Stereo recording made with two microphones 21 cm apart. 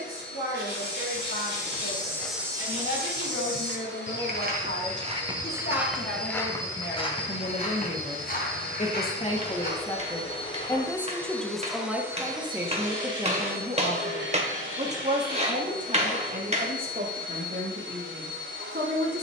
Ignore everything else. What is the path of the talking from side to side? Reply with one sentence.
You can hear the talking travel towards the right.